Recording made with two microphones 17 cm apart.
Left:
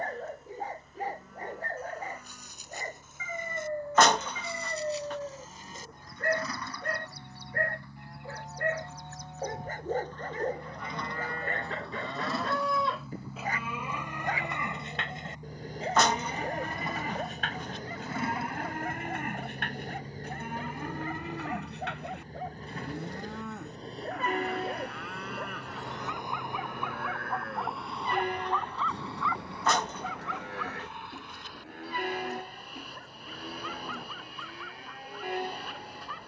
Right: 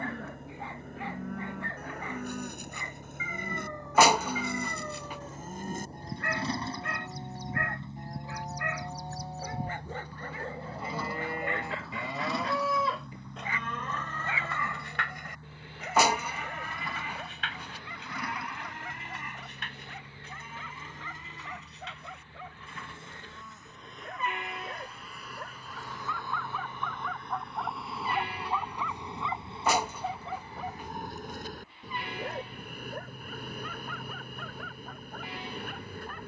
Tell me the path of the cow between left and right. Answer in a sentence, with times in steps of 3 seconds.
In this clip you hear the cow on the right from 0 s, in the centre from 12 s and on the left from 15 s.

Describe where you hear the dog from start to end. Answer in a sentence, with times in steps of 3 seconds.
You can hear the dog on the left from 0 s, in the centre from 27 s and on the right from 30 s.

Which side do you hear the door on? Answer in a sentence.
You can hear the door in the centre.